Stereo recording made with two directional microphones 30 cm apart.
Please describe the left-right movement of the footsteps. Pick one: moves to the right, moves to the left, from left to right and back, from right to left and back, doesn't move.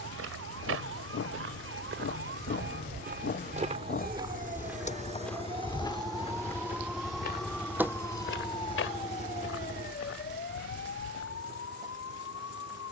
moves to the left.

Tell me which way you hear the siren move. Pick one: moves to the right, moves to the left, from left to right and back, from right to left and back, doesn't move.
moves to the left.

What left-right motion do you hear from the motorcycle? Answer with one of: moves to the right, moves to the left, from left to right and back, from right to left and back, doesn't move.
moves to the right.